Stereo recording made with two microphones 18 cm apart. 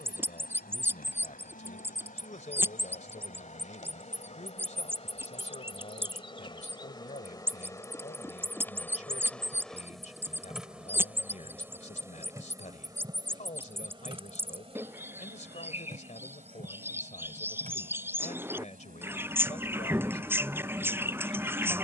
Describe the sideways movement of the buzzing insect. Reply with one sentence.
You can hear the buzzing insect move to the right.